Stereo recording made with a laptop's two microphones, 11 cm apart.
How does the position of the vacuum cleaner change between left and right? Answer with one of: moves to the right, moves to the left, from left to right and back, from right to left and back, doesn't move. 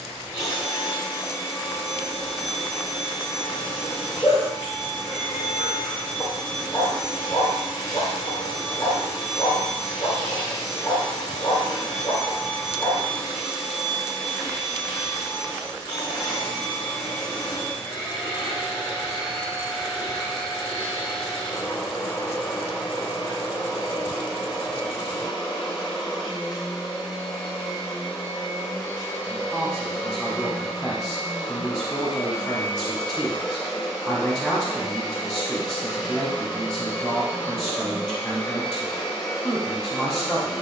doesn't move.